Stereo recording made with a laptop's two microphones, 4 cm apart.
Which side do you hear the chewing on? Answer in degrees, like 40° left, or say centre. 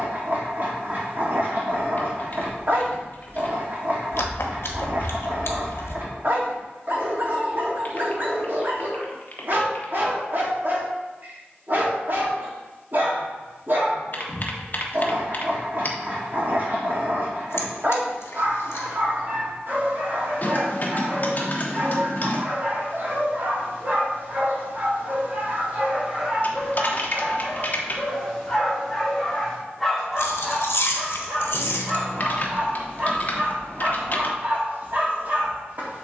70° left.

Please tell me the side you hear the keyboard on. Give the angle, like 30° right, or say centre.
40° left.